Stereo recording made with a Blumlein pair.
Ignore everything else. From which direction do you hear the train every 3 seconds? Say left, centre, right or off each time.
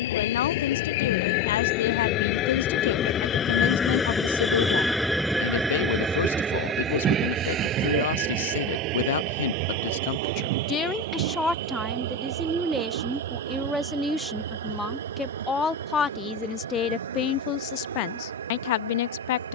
left, centre, right, right, right, right, right.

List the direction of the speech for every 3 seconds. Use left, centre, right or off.
left, left, left, left, centre, left, left.